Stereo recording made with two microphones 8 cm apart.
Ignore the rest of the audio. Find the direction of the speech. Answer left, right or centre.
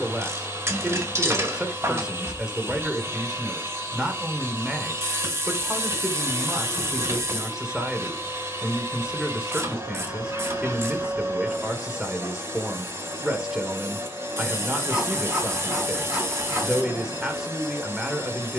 centre.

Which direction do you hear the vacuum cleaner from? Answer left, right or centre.
right.